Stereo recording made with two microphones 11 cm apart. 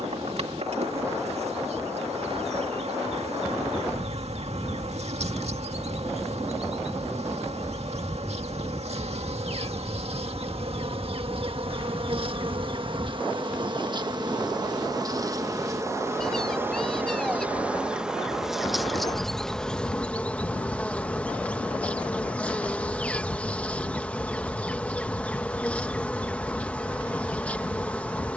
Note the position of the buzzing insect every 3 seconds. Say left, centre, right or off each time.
right, right, right, right, right, right, centre, centre, centre, centre.